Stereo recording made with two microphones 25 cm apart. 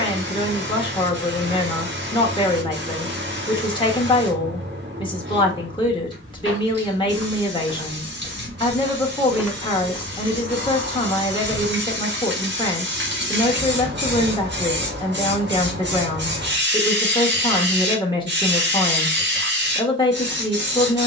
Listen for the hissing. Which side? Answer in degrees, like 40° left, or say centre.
40° right.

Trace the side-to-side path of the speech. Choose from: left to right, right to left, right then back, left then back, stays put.
stays put.